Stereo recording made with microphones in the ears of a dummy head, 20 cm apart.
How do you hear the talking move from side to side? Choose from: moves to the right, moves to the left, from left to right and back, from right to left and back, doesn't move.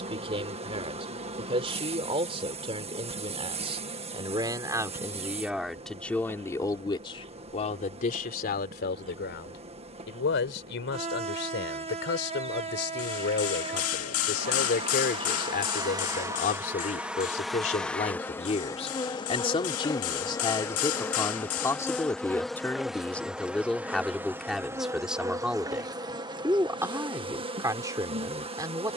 from right to left and back.